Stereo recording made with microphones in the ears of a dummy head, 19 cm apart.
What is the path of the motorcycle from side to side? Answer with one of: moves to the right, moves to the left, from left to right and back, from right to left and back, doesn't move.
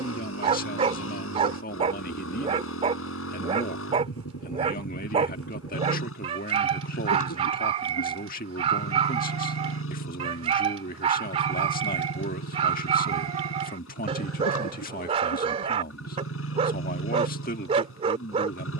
doesn't move.